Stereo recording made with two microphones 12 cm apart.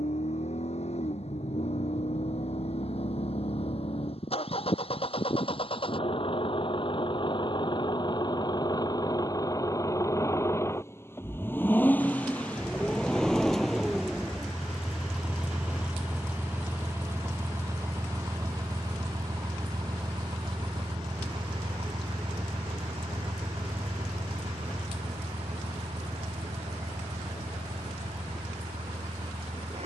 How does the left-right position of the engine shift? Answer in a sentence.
In this clip you hear the engine travel towards the right.